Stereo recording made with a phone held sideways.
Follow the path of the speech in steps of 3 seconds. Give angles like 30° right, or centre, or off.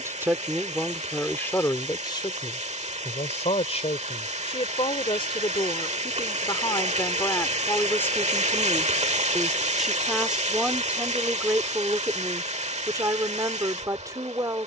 10° left, 40° left, 20° left, 10° right, 20° right.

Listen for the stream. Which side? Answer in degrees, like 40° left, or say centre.
40° right.